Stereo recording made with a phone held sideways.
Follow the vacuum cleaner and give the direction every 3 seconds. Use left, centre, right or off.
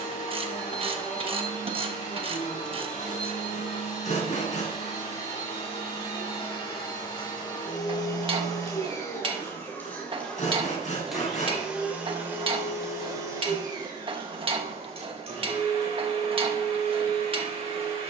left, left, left, centre, right, right.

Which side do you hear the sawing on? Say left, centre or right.
left.